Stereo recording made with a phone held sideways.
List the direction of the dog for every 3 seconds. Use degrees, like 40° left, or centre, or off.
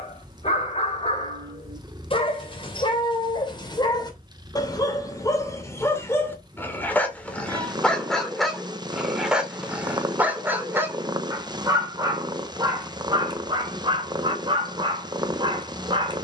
40° left, 30° left, 10° left, 10° right, 30° right, 30° right.